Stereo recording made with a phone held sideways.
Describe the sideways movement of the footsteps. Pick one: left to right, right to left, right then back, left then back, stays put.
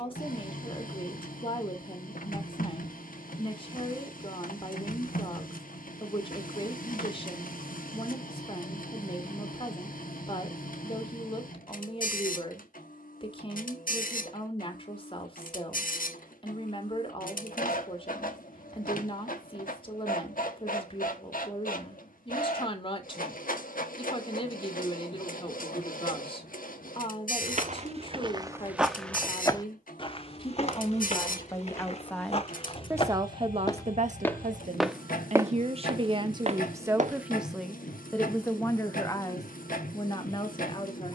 left then back.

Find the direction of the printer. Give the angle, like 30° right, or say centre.
70° left.